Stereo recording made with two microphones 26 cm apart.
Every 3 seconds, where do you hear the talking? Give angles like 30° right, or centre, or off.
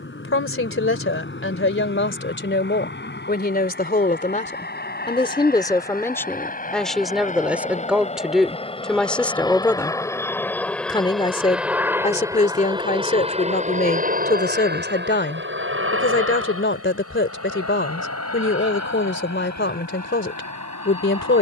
50° left, 30° left, centre, 10° left, 30° left, 50° left, 50° left.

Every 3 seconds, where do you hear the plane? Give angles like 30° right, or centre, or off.
50° left, 40° left, 30° left, 10° left, 20° right, 50° right, 70° right.